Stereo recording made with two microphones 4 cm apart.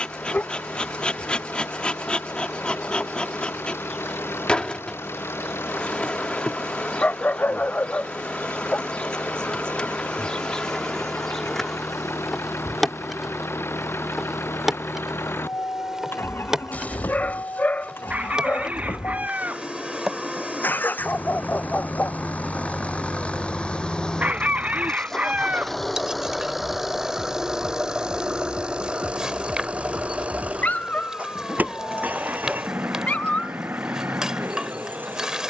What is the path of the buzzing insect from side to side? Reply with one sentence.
You can hear the buzzing insect go from the left side to the right.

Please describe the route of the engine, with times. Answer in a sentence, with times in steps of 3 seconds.
In this clip you hear the engine on the left from 0 s, in the centre from 24 s and on the right from 27 s.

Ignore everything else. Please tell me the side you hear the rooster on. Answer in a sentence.
In this clip you hear the rooster on the right.